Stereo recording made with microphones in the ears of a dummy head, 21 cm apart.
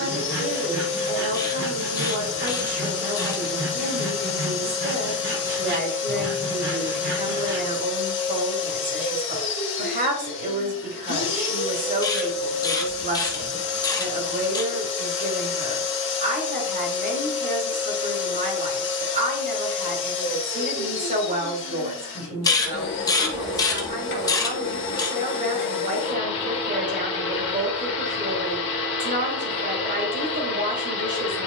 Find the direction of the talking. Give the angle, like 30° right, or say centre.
30° right.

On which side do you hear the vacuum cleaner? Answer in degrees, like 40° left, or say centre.
50° left.